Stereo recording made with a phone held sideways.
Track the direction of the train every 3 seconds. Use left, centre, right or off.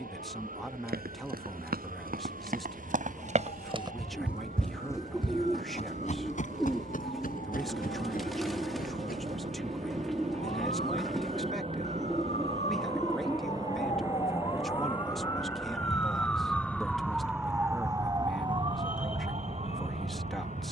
right, right, right, right, right, centre, left.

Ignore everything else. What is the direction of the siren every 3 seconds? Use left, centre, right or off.
left, left, left, left, left, centre, right.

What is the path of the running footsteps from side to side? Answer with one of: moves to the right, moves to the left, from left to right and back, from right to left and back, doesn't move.
moves to the left.